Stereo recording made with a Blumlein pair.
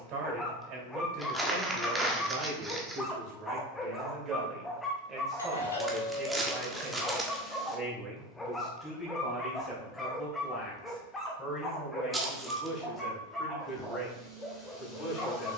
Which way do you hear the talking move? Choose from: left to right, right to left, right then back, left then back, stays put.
right to left.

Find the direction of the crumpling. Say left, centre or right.
centre.